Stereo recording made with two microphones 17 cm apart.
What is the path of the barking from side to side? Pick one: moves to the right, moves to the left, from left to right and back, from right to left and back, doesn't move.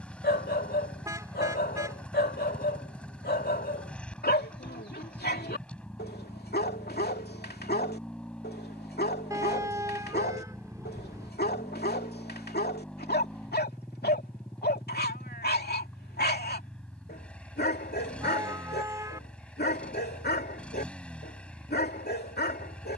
doesn't move.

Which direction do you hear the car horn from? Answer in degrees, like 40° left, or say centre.
20° right.